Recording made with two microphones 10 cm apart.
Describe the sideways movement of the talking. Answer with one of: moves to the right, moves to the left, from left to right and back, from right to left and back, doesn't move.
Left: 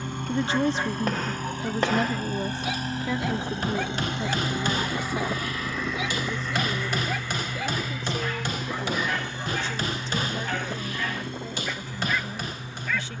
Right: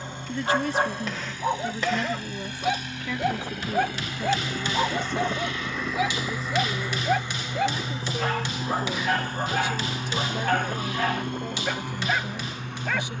moves to the right.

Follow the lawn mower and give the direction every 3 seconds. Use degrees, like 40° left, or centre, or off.
50° left, 20° left, 20° right, 50° right, 60° right.